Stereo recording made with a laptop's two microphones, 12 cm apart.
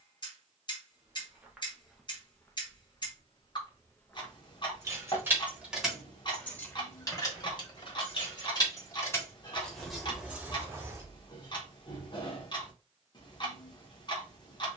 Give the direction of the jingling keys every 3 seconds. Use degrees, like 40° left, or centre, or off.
off, 10° right, 30° left, centre, off.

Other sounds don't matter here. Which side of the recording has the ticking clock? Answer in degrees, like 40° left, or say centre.
40° left.